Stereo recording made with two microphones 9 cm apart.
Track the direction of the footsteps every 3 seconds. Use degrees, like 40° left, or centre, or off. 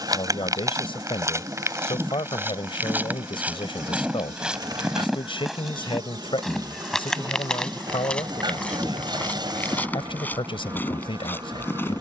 30° right, 10° right, 10° left, 20° left.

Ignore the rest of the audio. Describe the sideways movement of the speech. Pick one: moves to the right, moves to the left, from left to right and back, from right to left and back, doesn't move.
doesn't move.